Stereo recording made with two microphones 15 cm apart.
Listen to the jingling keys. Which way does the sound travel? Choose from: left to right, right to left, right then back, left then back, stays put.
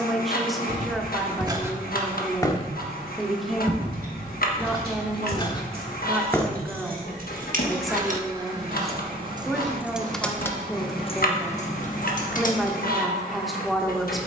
right to left.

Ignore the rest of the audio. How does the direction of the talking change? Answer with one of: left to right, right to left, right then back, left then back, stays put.
stays put.